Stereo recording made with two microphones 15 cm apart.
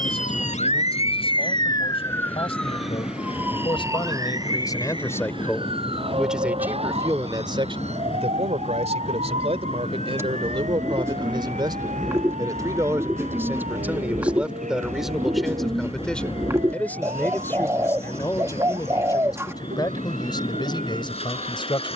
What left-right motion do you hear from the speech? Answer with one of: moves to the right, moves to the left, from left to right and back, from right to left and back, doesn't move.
from left to right and back.